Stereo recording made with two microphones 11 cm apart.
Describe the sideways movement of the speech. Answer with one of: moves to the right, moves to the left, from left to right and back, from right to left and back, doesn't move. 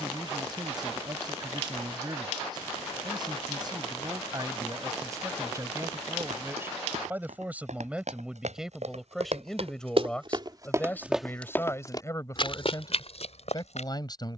moves to the left.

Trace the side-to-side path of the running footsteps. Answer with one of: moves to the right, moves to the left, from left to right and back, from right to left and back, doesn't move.
moves to the left.